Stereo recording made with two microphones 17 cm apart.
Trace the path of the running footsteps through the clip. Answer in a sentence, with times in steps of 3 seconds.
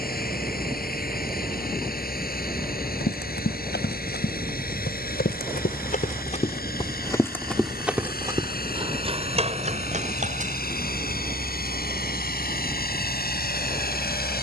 You can hear the running footsteps not at all from 0 s, on the left from 3 s, in the centre from 6 s, on the right from 9 s and not at all from 12 s.